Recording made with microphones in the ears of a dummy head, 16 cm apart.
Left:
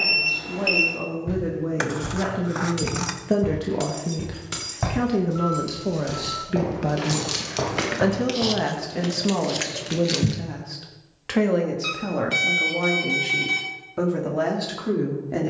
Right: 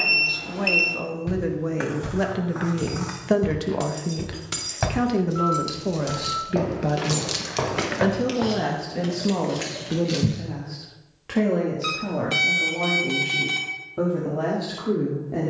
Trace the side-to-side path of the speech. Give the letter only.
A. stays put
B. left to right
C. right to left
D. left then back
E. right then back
C.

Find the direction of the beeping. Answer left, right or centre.
centre.